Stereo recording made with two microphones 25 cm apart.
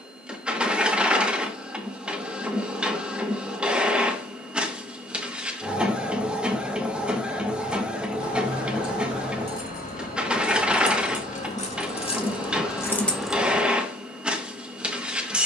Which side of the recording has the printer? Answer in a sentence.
In this clip you hear the printer in the centre.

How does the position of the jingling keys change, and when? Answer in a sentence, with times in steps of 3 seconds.
In this clip you hear the jingling keys not at all from 0 s, on the left from 6 s and in the centre from 12 s.